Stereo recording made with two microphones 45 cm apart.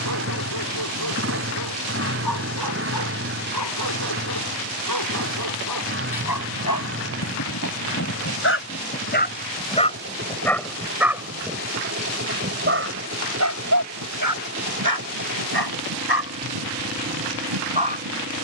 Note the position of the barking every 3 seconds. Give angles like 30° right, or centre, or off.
50° left, 50° left, 40° left, 10° left, 40° right, 60° right.